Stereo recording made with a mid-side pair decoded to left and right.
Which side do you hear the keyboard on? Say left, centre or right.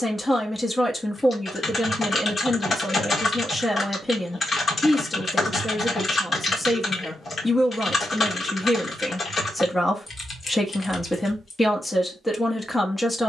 left.